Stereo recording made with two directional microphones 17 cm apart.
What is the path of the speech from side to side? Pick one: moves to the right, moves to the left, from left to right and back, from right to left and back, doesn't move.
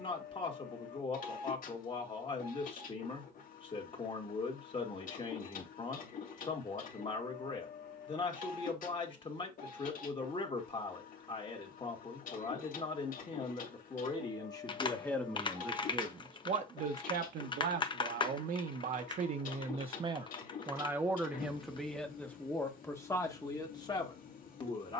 from left to right and back.